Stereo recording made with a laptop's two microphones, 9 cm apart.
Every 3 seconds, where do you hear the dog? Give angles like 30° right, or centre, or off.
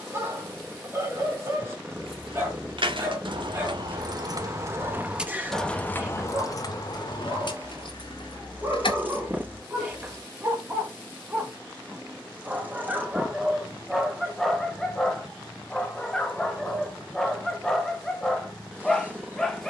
30° right, 30° right, 30° right, 20° right, centre, 10° left, 10° left.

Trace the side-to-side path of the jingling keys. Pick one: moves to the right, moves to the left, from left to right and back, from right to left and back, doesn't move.
moves to the left.